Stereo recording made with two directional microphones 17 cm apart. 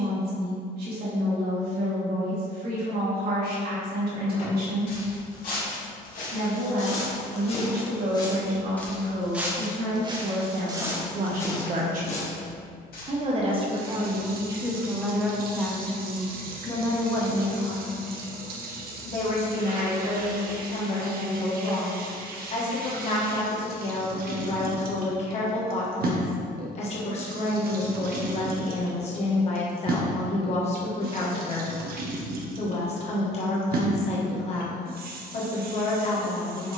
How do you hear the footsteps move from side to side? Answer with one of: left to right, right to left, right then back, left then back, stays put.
right then back.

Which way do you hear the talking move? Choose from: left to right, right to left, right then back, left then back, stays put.
right to left.